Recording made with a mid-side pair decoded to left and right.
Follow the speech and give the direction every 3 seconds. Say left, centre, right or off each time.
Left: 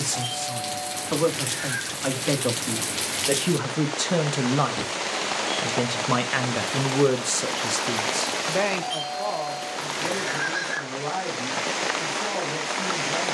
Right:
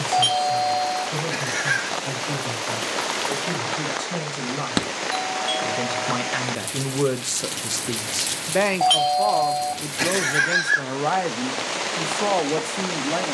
left, left, centre, right, right.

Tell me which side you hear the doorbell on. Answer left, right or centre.
right.